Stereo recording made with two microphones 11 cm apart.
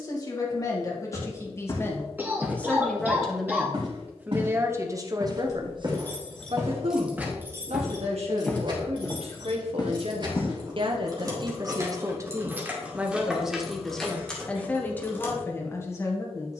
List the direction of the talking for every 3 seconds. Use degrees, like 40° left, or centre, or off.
30° left, 20° right, 70° right, 60° right, centre, 20° left.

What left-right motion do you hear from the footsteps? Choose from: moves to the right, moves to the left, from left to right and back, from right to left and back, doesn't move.
from left to right and back.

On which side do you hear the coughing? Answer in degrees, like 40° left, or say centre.
20° right.